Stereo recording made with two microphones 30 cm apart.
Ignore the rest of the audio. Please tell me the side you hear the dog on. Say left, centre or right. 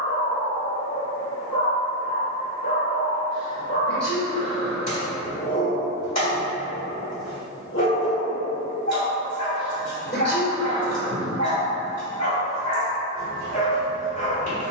left.